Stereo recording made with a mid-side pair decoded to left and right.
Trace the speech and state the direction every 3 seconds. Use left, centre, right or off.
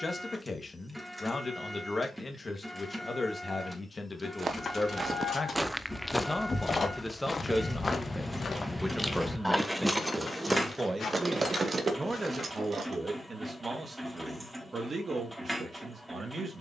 left, left, centre, right, right, right.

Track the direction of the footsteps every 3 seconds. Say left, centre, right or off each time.
off, right, left, left, left, off.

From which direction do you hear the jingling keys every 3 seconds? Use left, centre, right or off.
off, left, left, right, right, off.